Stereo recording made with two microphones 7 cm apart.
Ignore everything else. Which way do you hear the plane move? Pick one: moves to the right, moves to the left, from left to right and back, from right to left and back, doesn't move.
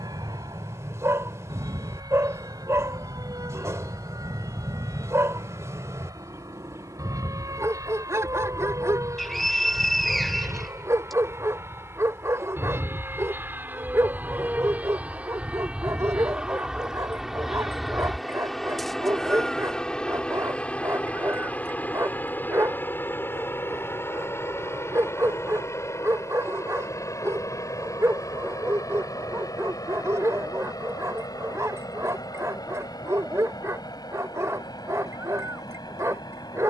moves to the left.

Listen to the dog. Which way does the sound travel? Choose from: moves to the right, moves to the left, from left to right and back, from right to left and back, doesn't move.
doesn't move.